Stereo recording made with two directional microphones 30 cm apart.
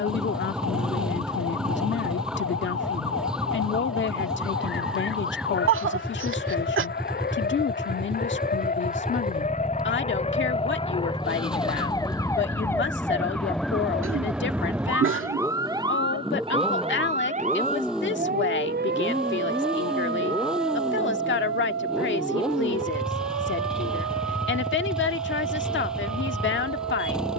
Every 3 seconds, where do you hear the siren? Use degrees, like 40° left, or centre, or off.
50° left, 40° left, 30° left, 20° left, centre, 20° right, 40° right, 50° right, 60° right.